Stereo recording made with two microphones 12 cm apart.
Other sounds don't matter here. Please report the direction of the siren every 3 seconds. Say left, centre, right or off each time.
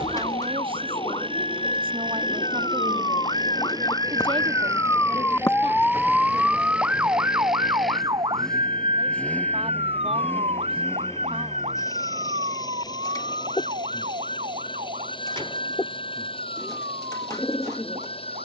left, left, right, right, right, right.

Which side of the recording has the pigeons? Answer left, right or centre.
left.